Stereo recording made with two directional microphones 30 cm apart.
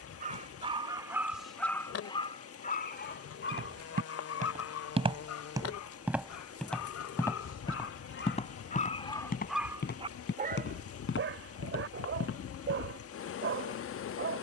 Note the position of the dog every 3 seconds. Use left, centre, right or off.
centre, left, left, right, right.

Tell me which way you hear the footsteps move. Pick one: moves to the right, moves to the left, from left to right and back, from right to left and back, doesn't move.
moves to the left.